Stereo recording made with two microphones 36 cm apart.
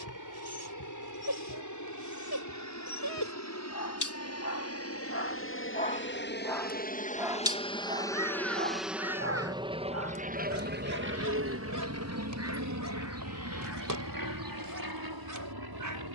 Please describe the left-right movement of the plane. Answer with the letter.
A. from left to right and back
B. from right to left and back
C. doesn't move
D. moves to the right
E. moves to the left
D.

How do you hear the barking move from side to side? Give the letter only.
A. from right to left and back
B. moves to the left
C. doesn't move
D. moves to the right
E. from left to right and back
D.